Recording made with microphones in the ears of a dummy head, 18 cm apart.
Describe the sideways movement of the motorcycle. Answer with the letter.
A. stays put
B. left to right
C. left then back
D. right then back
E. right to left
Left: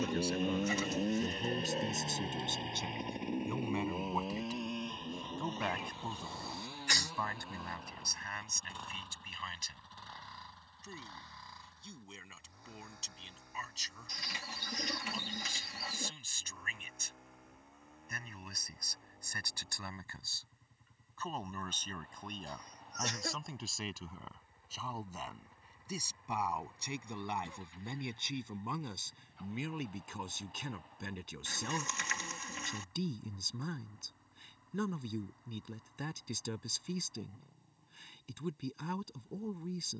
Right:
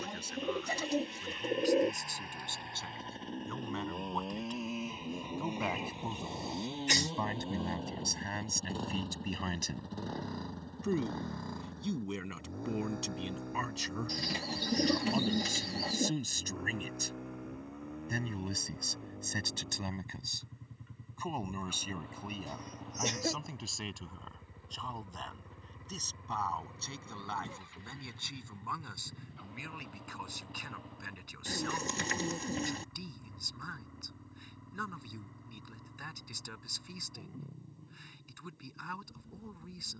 B.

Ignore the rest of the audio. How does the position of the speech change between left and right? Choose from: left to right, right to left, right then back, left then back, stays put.
right then back.